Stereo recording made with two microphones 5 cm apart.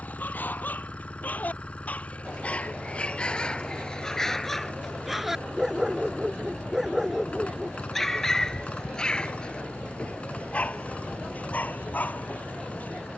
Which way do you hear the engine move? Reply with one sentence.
You can hear the engine stay in one place.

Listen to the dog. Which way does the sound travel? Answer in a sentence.
In this clip you hear the dog go right and come back.